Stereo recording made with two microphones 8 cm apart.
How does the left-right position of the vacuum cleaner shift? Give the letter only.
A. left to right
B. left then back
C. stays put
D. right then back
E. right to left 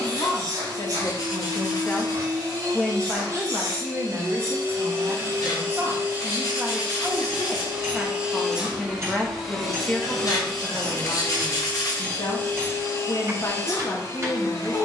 E.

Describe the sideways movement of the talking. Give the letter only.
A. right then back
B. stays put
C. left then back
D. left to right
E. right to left
A.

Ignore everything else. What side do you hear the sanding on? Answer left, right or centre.
left.